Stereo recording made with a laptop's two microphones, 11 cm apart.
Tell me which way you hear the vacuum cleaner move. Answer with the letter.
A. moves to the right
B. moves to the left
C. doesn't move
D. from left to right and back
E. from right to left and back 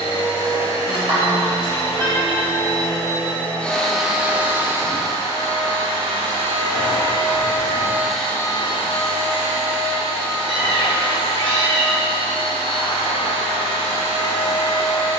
D.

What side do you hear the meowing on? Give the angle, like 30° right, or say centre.
50° right.